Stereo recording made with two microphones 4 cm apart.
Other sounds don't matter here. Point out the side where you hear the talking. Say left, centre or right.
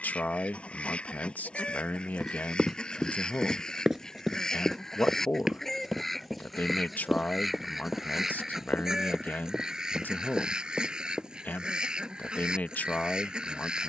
left.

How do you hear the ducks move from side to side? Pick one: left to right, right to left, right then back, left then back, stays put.
left to right.